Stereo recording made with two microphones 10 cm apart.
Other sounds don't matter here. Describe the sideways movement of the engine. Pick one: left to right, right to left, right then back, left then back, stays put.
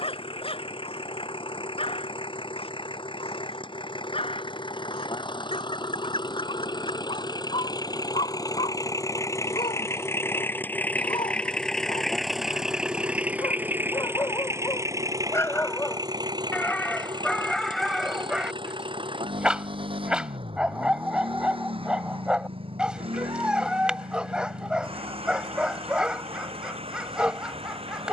left to right.